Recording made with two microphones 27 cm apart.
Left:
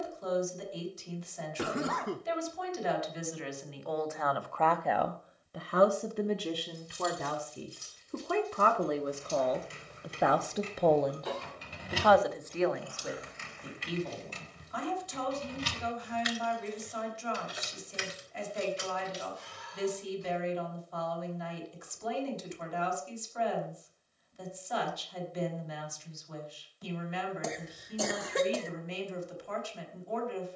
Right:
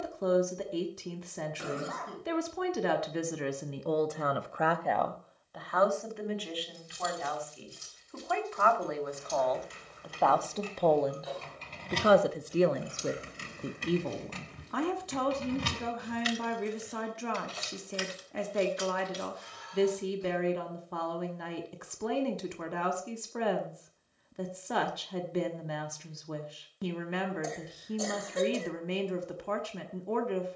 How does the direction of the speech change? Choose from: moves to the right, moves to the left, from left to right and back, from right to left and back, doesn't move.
from right to left and back.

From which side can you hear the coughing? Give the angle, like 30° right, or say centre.
80° left.